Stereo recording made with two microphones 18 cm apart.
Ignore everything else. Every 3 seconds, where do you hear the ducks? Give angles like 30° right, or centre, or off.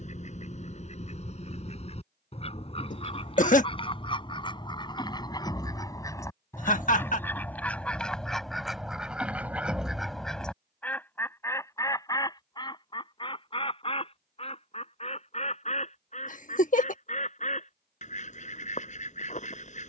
40° left, 30° left, 10° left, centre, 30° left, 40° left, 40° left.